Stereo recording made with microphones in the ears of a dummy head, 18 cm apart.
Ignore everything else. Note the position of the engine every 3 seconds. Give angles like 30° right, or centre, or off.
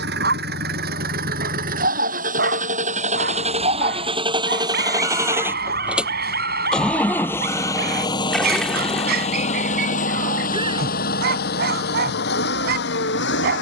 50° right, 20° right, 10° left, 40° left, 60° left.